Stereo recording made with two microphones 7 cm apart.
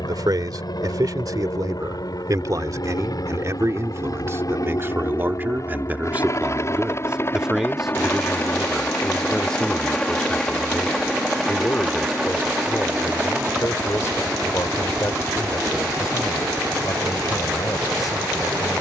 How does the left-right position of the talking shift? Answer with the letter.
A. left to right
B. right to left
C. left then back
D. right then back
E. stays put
B.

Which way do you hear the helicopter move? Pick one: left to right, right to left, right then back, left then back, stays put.
left to right.